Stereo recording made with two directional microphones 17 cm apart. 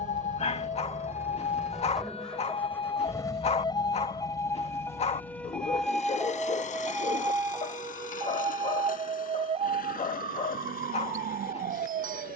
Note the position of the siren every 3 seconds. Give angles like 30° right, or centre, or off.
40° left, 20° left, 20° right, 40° right.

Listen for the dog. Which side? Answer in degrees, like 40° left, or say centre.
40° left.